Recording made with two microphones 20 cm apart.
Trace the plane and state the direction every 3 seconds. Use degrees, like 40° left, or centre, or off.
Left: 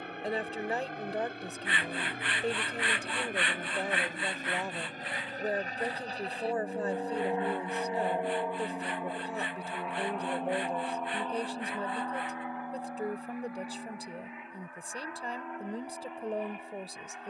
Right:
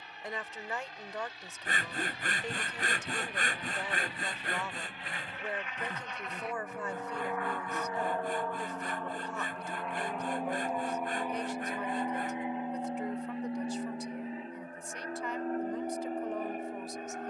60° left, 50° left, 20° left, centre, 30° right, 40° right.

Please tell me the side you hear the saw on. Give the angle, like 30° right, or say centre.
40° right.